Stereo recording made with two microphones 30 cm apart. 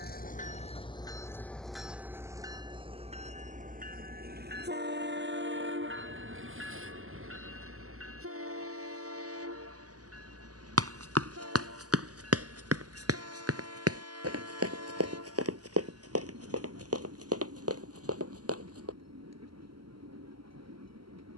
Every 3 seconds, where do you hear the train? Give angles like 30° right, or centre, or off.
10° left, 30° right, 50° right, 60° right, 60° right, 60° right, 60° right.